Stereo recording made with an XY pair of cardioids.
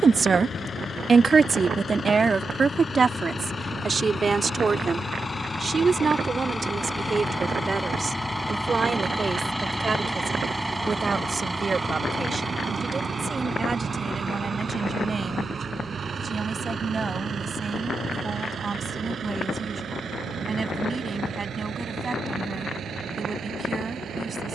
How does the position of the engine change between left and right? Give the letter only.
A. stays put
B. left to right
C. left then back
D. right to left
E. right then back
B.